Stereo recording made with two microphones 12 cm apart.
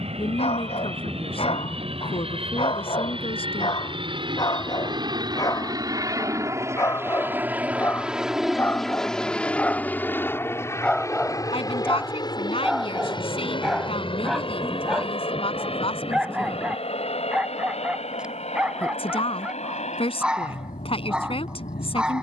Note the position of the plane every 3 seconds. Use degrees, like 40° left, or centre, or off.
60° right, 50° right, 10° right, 20° left, 40° left, 50° left, 60° left, 60° left.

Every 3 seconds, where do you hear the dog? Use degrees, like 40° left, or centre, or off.
60° left, 40° left, 20° left, 10° left, centre, 10° right, 10° right, 10° right.